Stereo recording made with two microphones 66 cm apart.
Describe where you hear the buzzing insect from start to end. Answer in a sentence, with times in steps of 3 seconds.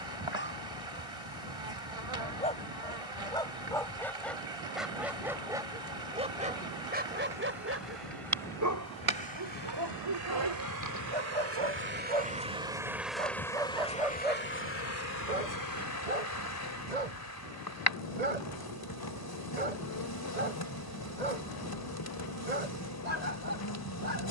You can hear the buzzing insect on the right from 0 s, in the centre from 12 s and on the left from 15 s.